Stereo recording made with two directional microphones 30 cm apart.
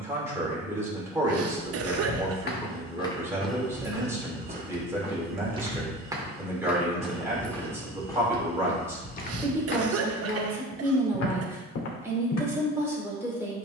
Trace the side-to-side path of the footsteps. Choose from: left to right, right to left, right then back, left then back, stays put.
right then back.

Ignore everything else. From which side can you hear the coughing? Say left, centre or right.
right.